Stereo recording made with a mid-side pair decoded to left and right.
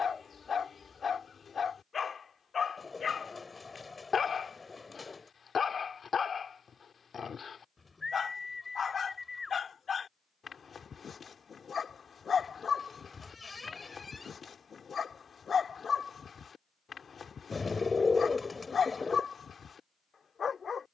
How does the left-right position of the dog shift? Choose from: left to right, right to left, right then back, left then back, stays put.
stays put.